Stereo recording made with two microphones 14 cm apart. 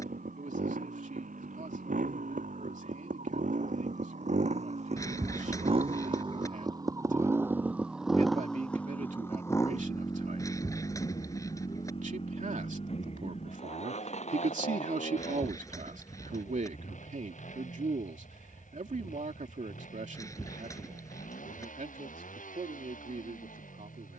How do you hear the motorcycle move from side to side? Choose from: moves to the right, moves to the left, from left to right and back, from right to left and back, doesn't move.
moves to the left.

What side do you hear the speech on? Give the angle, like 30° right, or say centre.
60° right.